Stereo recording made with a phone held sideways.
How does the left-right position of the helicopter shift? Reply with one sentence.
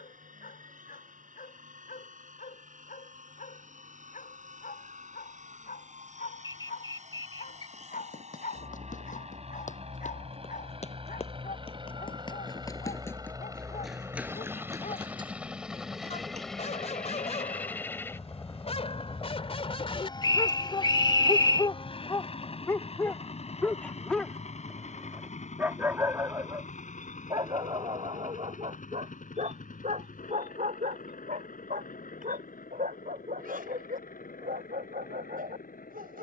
In this clip you hear the helicopter go from the right side to the left.